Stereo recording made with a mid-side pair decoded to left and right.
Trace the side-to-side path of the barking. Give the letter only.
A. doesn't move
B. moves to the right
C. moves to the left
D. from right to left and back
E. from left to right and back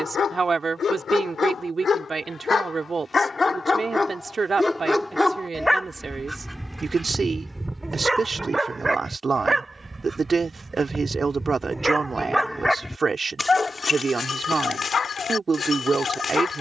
E.